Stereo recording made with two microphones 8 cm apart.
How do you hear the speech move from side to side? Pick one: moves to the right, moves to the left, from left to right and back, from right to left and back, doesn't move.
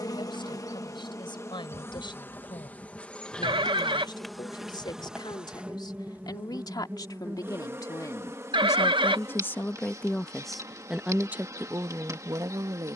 moves to the right.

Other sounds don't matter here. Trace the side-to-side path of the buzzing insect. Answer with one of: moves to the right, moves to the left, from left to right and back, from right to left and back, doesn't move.
moves to the right.